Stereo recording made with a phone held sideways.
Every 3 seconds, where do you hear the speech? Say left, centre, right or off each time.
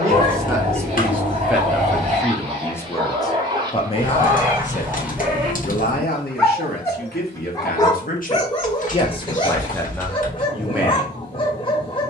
centre, left, left, centre.